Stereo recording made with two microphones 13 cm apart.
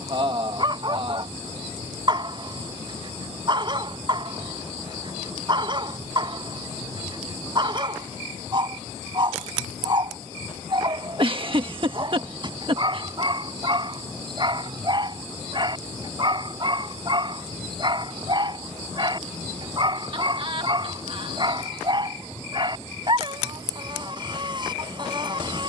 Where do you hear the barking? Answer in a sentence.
In this clip you hear the barking on the right.